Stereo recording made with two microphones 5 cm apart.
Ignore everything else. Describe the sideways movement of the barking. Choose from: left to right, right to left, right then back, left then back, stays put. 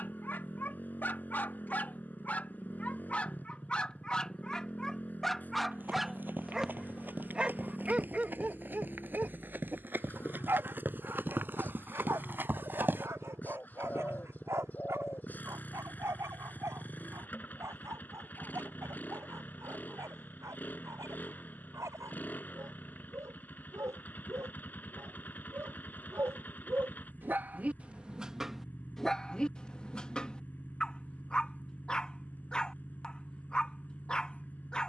right then back.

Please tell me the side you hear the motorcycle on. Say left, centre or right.
left.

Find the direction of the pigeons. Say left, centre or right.
left.